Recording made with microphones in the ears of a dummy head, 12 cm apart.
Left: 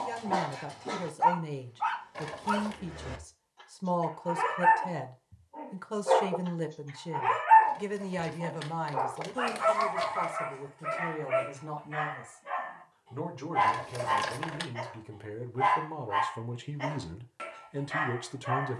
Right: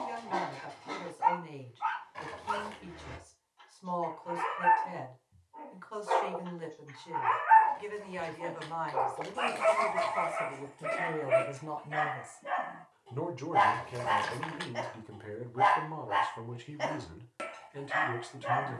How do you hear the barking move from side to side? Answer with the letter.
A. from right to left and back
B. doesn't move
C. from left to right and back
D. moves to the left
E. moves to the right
E.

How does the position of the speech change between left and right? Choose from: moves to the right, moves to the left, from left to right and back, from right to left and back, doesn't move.
from left to right and back.